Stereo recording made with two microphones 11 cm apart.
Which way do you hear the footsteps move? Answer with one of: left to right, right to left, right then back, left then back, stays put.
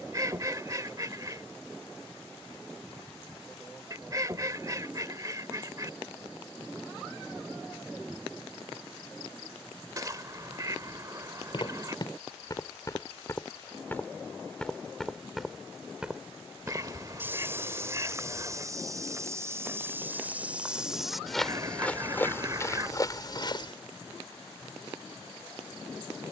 right then back.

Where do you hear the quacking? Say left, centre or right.
right.